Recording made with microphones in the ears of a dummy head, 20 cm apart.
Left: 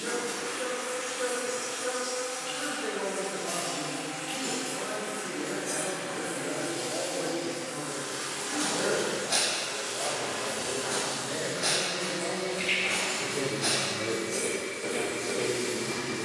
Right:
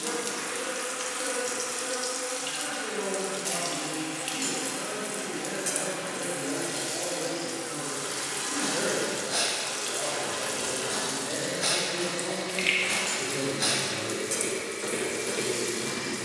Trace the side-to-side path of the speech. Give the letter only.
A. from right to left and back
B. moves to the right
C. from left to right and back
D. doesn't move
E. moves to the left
C.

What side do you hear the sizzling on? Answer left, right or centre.
right.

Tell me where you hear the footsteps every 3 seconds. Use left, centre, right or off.
off, off, left, centre, right, right.